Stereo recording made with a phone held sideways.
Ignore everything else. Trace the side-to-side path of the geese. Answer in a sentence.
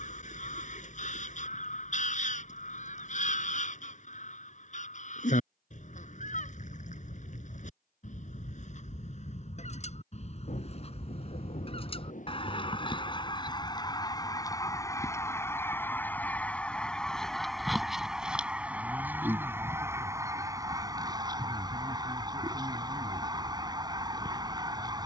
In this clip you hear the geese travel towards the right.